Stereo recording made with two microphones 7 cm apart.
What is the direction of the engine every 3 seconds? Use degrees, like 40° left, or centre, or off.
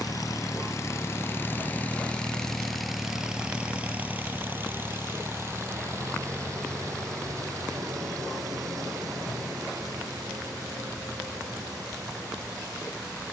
30° left, 20° right, 50° right, 60° right, 60° right.